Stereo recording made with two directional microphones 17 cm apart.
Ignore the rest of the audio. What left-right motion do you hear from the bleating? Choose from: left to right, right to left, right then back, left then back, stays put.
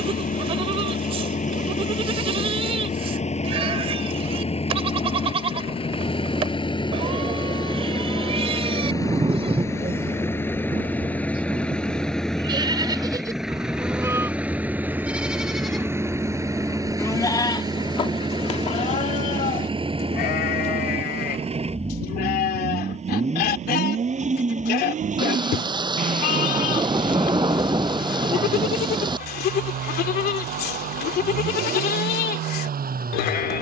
right to left.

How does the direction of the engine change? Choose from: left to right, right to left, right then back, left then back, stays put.
left to right.